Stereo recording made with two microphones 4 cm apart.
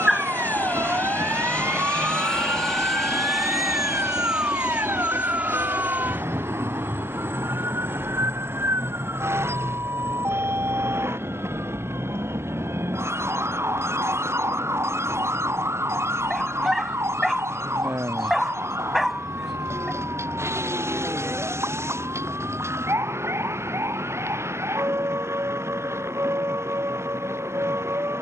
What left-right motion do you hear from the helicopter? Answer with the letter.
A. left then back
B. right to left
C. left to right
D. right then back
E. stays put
C.